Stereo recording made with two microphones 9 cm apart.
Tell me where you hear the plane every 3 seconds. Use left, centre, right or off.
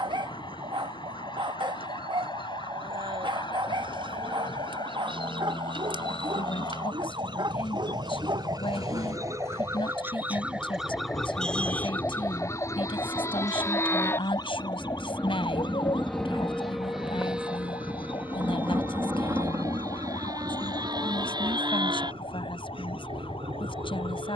left, left, left, left, left, centre, right, right.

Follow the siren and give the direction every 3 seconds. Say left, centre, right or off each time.
right, right, right, centre, left, left, left, left.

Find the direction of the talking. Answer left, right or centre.
left.